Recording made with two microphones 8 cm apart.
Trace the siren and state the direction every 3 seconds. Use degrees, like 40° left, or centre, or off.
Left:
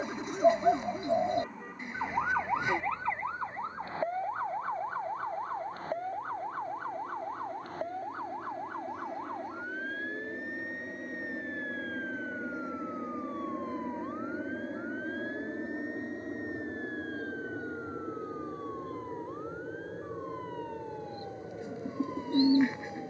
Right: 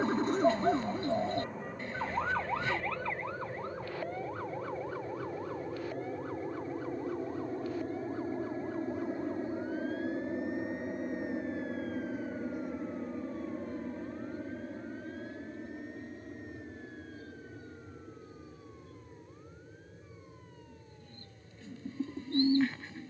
centre, 30° left, 40° left, 50° left, 50° left, 60° left, 60° left, 60° left.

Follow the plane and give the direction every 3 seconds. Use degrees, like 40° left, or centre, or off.
70° right, 60° right, 40° right, 20° right, 10° left, 30° left, 50° left, 60° left.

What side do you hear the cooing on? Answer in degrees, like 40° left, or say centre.
20° left.